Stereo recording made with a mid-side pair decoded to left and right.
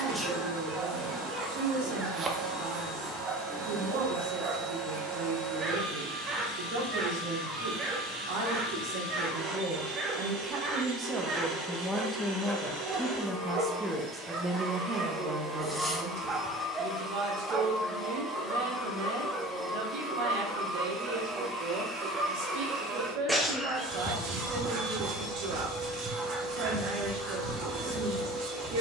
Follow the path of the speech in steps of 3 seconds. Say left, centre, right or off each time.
right, right, right, right, centre, right, right, right, right, right.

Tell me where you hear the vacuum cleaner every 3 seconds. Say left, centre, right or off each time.
right, right, right, right, right, centre, centre, right, right, right.